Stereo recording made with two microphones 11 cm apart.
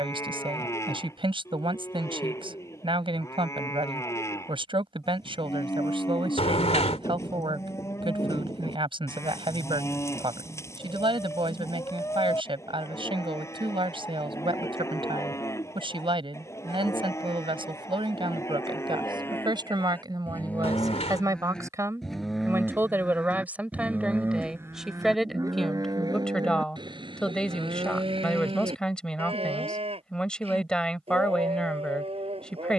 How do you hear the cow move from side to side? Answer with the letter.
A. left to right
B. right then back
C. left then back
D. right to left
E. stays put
A.